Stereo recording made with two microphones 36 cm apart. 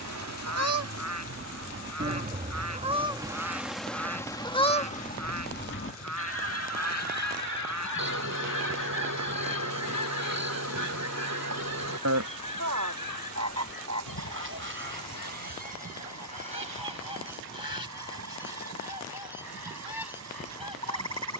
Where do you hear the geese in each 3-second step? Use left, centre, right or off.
right, centre, left, left, left, left, left.